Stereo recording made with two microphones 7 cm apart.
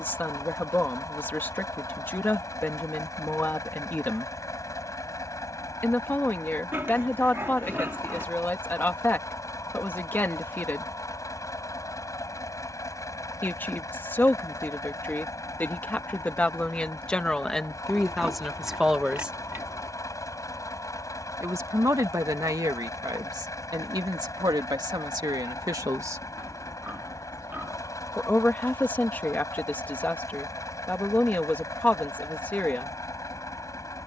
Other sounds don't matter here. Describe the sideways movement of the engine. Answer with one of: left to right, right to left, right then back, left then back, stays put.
stays put.